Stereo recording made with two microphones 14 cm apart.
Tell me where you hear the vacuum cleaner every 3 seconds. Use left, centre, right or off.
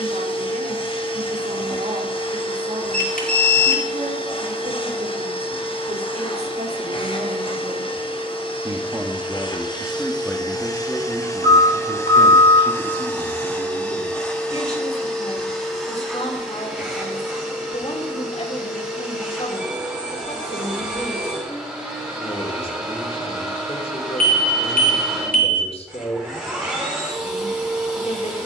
left, left, left, left, centre, centre, centre, centre, centre, centre.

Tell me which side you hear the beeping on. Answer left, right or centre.
left.